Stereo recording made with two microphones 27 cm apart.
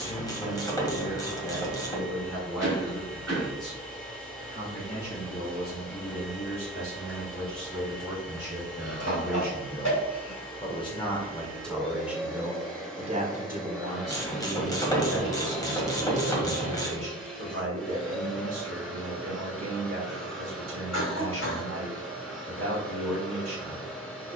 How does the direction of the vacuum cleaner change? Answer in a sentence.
You can hear the vacuum cleaner stay in one place.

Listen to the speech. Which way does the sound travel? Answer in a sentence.
In this clip you hear the speech go from the left side to the right.